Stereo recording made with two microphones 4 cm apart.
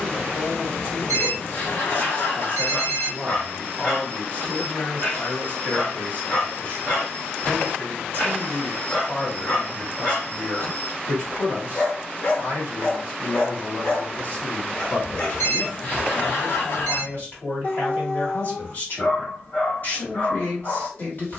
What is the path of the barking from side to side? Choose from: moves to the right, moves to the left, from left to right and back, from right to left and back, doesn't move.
doesn't move.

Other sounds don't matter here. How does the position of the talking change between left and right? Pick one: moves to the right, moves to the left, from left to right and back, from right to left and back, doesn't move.
doesn't move.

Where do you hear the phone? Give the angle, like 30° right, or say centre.
50° left.